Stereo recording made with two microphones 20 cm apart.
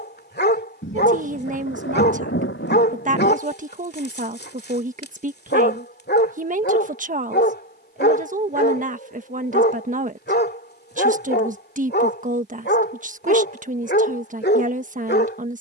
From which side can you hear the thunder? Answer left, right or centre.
left.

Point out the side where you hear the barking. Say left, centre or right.
left.